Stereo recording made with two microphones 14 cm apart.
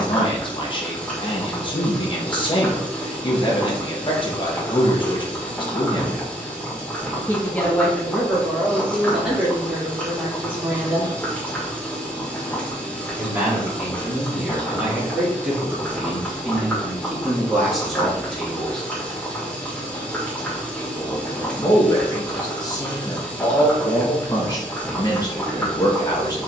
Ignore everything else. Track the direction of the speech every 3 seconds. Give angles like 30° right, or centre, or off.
40° left, 40° left, 10° left, 10° right, 10° right, centre, 10° left, 30° left, 30° left.